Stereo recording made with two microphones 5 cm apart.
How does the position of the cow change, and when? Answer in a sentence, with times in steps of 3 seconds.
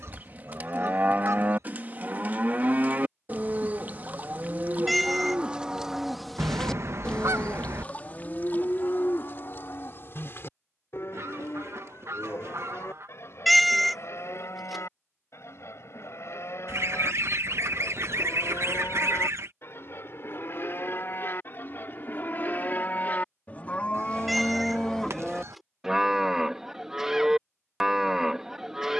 You can hear the cow on the right from 0 s, on the left from 6 s and in the centre from 24 s.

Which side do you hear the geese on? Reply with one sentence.
In this clip you hear the geese on the right.